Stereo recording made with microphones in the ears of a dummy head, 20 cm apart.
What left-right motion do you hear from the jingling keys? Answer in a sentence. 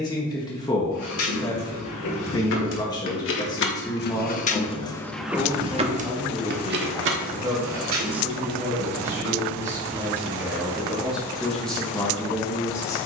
You can hear the jingling keys move from left to right.